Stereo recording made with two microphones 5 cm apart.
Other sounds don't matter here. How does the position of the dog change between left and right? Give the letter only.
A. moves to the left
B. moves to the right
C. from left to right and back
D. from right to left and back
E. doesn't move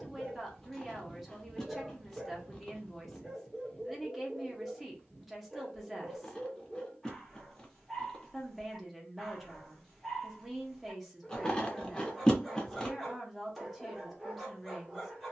E.